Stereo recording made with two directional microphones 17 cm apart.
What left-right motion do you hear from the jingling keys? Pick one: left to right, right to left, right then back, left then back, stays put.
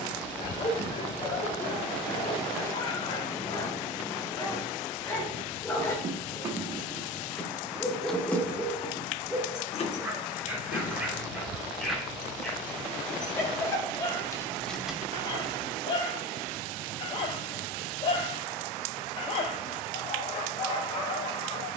left then back.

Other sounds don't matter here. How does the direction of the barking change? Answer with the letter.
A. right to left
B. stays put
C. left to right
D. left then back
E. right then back
E.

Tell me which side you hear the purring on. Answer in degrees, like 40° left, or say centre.
20° left.